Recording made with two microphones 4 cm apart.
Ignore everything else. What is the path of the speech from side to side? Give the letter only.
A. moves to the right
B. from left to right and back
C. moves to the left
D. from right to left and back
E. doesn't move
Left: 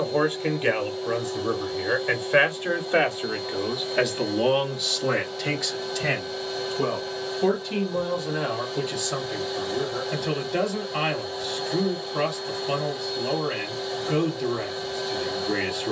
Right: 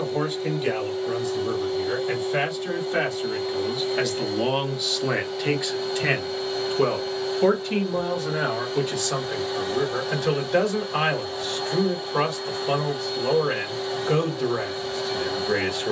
A.